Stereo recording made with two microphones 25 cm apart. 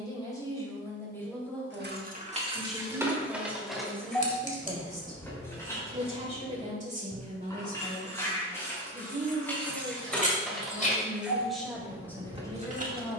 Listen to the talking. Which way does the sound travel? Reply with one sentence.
In this clip you hear the talking move from left to right and back again.